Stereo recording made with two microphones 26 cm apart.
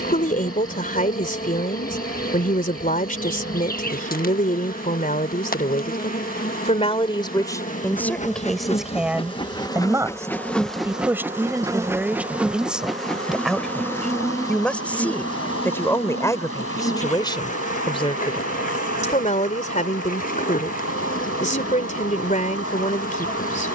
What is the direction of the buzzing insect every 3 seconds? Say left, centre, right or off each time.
left, left, left, centre, centre, left, left, left.